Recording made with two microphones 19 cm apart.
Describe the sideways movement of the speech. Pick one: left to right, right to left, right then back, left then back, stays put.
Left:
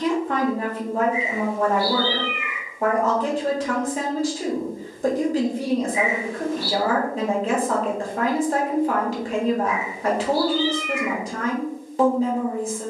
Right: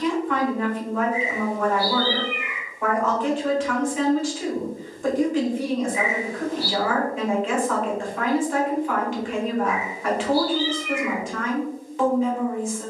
stays put.